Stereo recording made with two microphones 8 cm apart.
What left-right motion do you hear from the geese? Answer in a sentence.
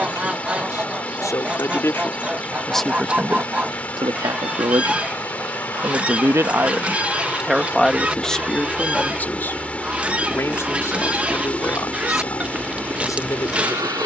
You can hear the geese stay put.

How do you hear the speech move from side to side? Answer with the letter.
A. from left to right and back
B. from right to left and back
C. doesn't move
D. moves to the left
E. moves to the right
A.